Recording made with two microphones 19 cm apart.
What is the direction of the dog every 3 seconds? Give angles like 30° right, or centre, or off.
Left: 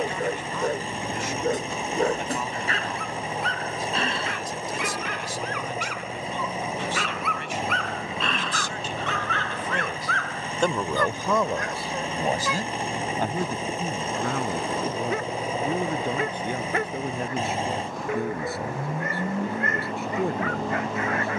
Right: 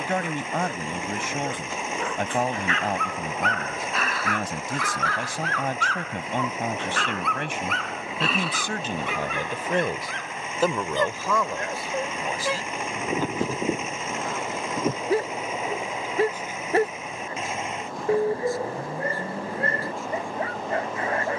40° left, 20° left, centre, 20° right, 30° right, 30° right, 30° right.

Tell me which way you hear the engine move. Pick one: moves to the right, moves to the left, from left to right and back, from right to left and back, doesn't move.
doesn't move.